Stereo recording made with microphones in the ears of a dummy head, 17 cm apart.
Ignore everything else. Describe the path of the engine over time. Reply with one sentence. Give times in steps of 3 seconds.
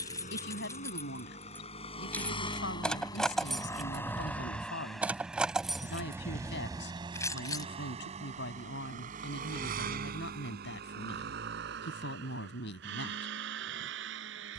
In this clip you hear the engine on the left from 0 s, in the centre from 3 s and on the right from 6 s.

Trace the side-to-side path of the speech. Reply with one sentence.
You can hear the speech stay in one place.